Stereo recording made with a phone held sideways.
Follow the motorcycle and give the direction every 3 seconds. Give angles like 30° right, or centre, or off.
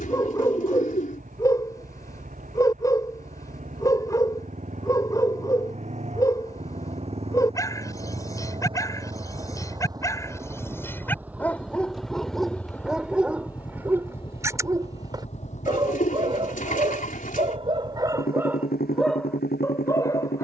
60° right, 50° right, 40° right, 20° right, 20° left, 50° left, 70° left.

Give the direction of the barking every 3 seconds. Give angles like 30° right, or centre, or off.
20° left, 20° left, 20° left, 20° left, 10° right, 30° right, centre.